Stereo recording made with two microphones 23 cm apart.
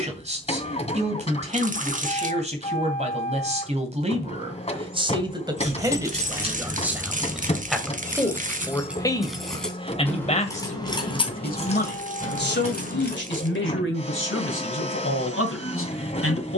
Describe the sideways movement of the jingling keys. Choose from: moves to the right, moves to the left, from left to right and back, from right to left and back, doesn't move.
moves to the left.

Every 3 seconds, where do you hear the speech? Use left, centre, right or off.
right, right, centre, left, left, left.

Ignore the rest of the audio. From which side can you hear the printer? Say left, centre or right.
left.